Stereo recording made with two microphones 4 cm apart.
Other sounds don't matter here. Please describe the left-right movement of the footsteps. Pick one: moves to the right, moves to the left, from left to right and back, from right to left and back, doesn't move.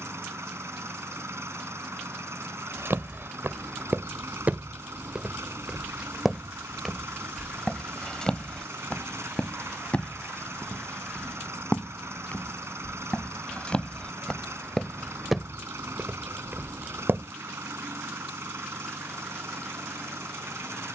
from right to left and back.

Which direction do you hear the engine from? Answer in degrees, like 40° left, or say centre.
80° right.